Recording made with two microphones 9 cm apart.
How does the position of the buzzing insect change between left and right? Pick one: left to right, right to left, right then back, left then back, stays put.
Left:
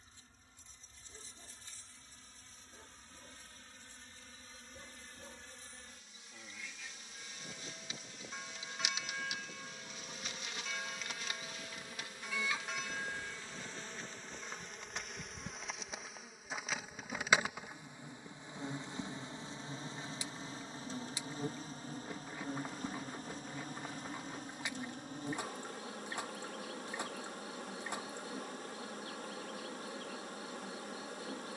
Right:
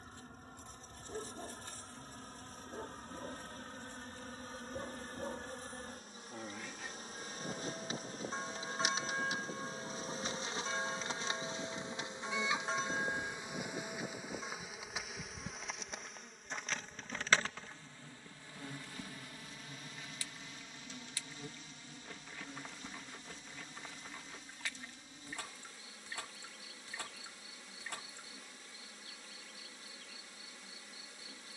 right to left.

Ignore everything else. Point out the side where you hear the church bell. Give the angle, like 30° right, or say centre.
30° right.